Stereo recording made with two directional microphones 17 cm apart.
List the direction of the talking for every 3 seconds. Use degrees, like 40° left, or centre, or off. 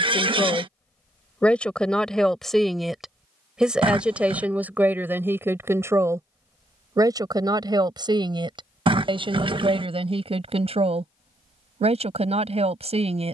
10° left, 10° right, 20° right, 40° right, 40° right.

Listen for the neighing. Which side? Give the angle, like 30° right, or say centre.
30° right.